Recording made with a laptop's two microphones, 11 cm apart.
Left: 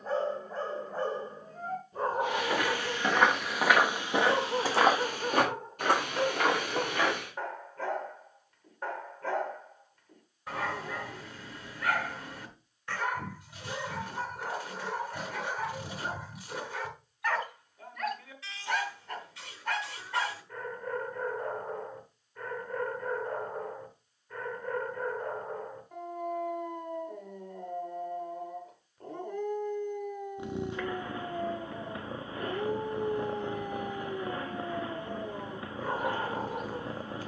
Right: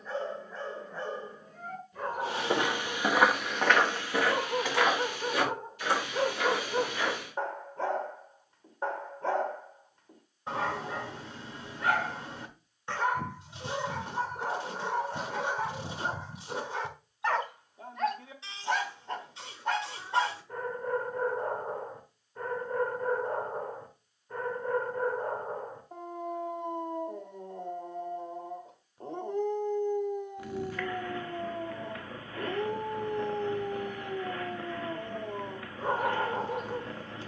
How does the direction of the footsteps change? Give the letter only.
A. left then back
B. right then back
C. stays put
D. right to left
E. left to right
D.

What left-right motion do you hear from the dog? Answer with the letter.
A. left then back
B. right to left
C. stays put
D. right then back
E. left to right
E.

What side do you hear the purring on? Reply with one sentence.
You can hear the purring on the left.